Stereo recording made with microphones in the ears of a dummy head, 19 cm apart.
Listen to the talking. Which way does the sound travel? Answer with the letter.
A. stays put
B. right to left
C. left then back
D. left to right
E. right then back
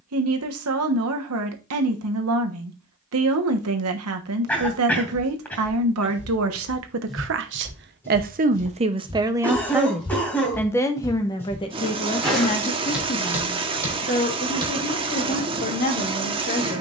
B.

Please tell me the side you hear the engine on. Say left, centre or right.
right.